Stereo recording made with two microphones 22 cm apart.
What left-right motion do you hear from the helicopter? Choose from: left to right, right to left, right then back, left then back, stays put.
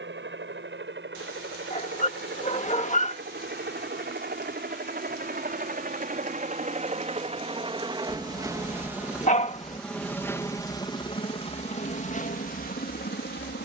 right to left.